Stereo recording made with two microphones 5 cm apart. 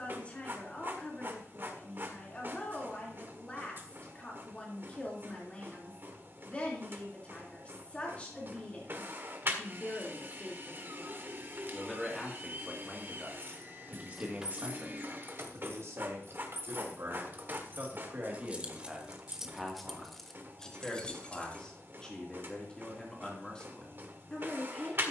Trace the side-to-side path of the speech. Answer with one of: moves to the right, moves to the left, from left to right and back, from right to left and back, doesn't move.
from left to right and back.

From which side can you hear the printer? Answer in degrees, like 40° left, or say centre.
40° right.